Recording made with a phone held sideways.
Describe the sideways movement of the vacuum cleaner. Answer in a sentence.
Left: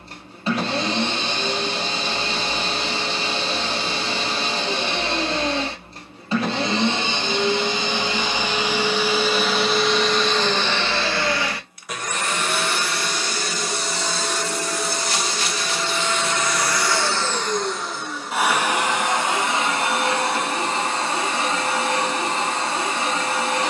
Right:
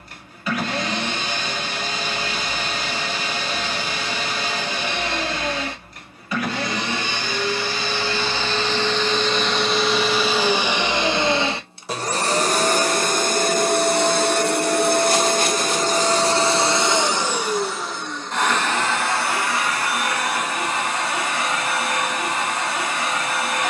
In this clip you hear the vacuum cleaner go right and come back.